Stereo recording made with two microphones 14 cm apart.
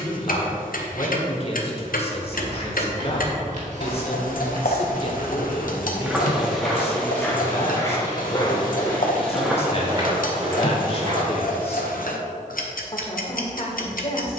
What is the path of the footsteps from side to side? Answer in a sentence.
In this clip you hear the footsteps go left and come back.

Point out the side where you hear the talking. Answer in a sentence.
In this clip you hear the talking on the left.